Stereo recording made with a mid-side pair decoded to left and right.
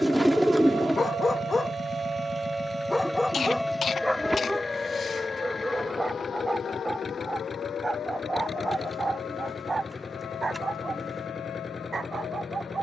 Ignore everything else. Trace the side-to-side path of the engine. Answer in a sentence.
In this clip you hear the engine stay put.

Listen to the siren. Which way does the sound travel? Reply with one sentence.
In this clip you hear the siren move to the left.